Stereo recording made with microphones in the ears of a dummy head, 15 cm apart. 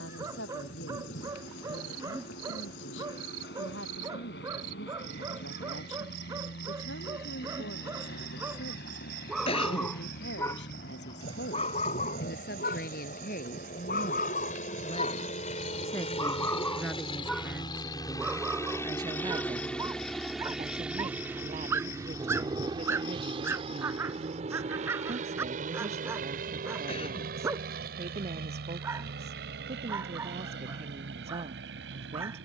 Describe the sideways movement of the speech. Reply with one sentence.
In this clip you hear the speech move to the right.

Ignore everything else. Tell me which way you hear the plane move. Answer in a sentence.
You can hear the plane go from the left side to the right.